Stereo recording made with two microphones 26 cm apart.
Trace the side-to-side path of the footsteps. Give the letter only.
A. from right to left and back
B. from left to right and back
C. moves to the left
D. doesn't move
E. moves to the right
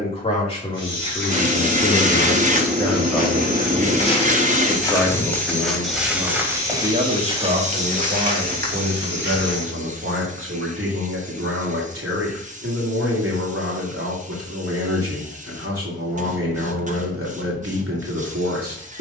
E.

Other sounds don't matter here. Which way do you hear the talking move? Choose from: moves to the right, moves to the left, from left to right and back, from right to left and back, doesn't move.
moves to the right.